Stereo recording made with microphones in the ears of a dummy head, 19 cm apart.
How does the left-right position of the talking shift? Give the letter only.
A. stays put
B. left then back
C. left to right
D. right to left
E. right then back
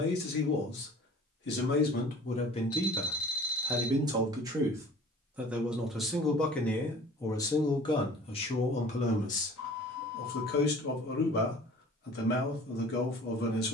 E.